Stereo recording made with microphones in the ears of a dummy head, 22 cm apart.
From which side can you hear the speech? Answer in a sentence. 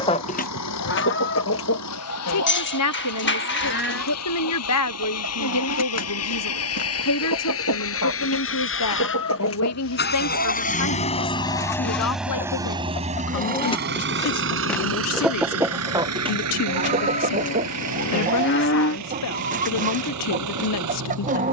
You can hear the speech on the left.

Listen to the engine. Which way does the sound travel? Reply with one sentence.
You can hear the engine move to the right.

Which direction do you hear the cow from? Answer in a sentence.
You can hear the cow on the left.